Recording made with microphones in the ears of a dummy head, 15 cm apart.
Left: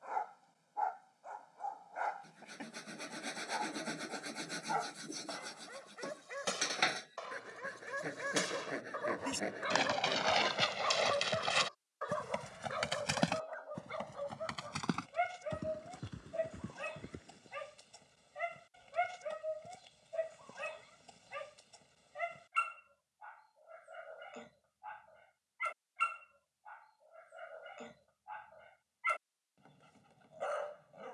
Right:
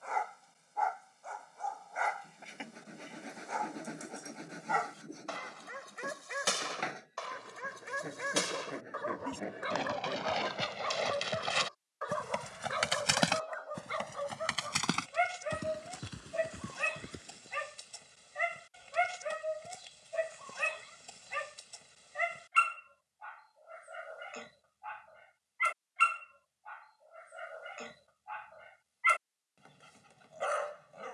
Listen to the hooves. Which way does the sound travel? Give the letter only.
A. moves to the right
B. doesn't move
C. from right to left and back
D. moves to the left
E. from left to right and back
A.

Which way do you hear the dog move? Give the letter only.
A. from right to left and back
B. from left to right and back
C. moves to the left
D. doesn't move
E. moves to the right
A.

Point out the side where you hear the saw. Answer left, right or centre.
left.